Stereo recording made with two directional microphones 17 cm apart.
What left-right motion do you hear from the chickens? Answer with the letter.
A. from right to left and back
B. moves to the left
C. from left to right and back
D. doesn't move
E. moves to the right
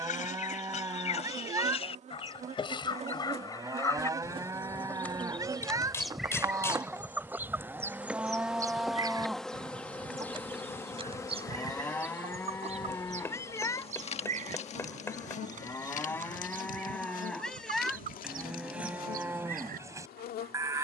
E.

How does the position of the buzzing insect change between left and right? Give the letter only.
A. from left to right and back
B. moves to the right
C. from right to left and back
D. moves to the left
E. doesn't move
D.